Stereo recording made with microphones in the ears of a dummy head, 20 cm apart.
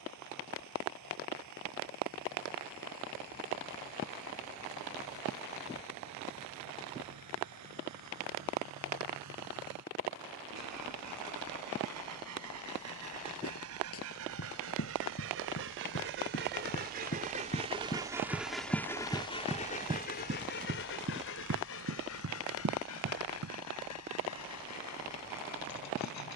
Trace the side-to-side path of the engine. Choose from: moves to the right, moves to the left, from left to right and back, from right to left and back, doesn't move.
moves to the left.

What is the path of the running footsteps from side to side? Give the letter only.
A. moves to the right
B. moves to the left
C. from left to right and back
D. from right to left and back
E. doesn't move
A.